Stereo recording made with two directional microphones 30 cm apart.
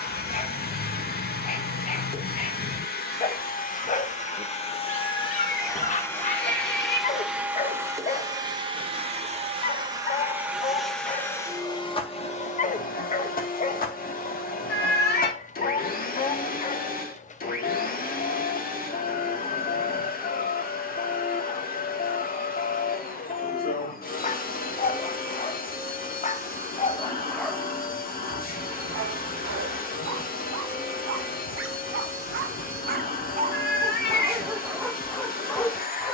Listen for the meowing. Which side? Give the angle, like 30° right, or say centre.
40° left.